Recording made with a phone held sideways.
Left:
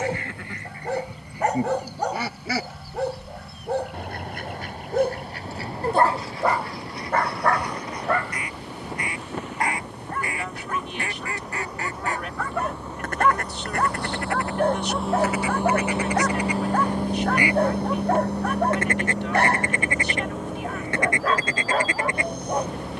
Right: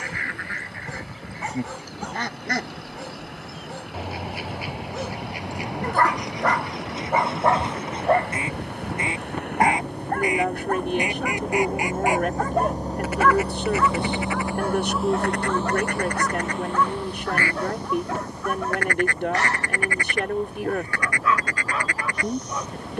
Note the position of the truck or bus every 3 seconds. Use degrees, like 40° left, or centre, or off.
70° right, 70° right, 60° right, 50° right, 30° right, 30° left, 70° left, 80° left.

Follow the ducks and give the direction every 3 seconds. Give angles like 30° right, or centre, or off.
10° left, 10° right, 20° right, 20° right, 10° right, 10° left, 20° left, 20° left.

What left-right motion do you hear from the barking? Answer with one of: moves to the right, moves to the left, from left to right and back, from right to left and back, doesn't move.
from left to right and back.